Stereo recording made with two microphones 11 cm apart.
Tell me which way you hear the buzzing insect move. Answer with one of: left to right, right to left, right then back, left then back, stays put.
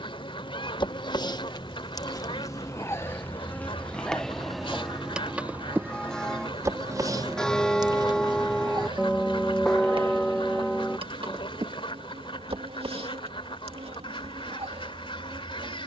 left to right.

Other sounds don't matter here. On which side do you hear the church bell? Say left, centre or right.
centre.